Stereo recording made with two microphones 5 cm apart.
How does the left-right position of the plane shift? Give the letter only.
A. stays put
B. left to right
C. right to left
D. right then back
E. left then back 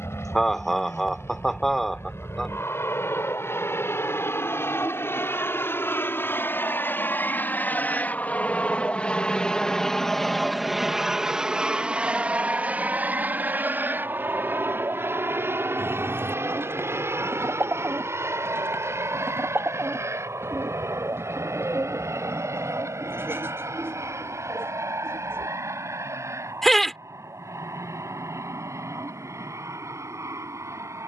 B.